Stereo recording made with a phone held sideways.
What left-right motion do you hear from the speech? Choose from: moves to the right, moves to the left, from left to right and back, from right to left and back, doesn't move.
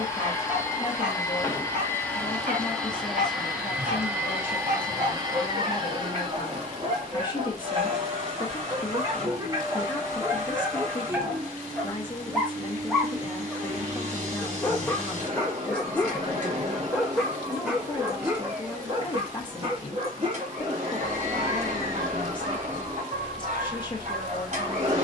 doesn't move.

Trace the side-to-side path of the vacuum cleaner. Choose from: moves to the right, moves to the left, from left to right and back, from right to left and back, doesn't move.
moves to the right.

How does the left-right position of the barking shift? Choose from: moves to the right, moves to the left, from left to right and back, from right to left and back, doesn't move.
from right to left and back.